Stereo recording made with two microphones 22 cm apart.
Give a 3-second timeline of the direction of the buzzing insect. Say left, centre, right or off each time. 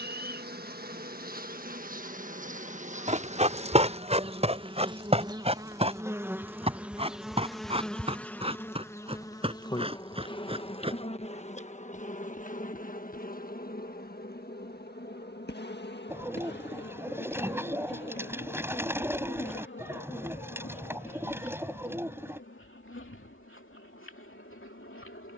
right, right, centre, left, left, left, left, left, left.